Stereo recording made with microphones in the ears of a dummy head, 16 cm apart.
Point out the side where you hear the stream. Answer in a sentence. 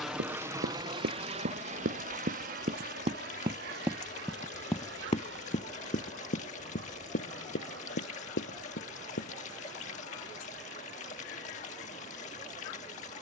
In this clip you hear the stream on the left.